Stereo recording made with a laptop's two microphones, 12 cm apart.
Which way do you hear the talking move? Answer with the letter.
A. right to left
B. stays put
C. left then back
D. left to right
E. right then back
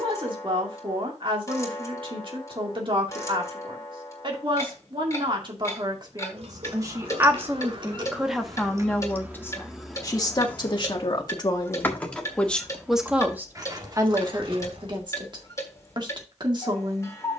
C.